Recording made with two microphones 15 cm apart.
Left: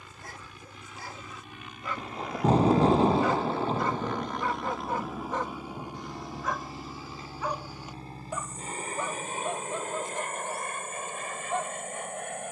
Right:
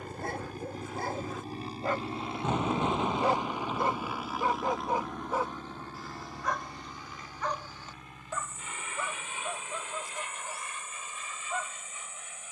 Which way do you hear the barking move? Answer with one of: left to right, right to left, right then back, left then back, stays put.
right to left.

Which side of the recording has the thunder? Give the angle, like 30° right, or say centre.
30° left.